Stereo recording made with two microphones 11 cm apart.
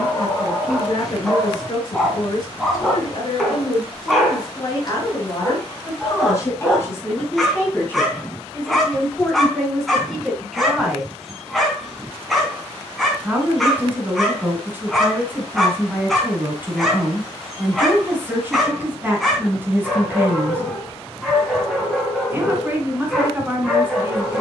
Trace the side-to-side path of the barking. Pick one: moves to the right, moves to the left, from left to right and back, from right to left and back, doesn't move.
doesn't move.